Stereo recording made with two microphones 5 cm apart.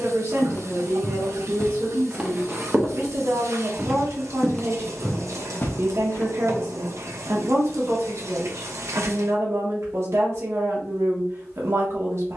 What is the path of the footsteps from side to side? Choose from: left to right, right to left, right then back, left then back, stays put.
right then back.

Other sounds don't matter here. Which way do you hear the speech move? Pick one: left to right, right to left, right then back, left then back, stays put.
stays put.